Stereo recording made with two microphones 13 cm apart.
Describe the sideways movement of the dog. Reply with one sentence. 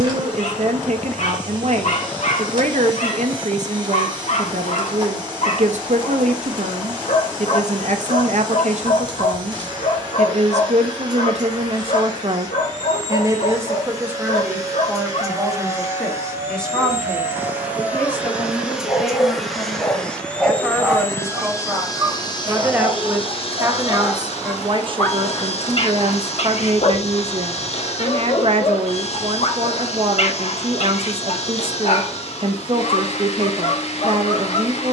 You can hear the dog go right and come back.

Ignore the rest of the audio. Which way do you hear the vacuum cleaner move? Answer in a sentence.
In this clip you hear the vacuum cleaner move to the left.